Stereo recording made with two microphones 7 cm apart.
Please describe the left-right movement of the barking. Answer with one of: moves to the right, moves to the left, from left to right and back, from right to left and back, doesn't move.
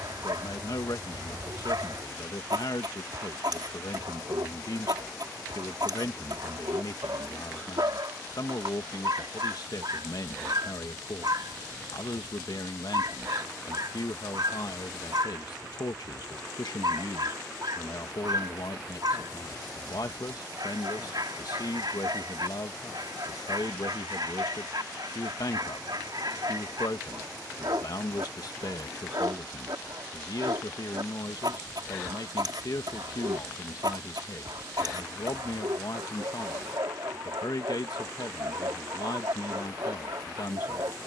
doesn't move.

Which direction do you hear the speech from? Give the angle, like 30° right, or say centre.
60° left.